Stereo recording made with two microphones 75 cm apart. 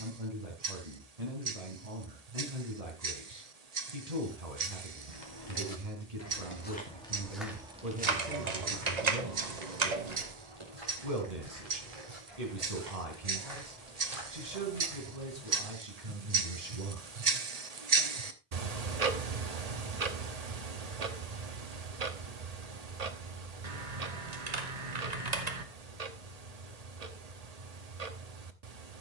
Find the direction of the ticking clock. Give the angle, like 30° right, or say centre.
60° right.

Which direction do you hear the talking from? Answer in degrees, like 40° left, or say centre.
60° right.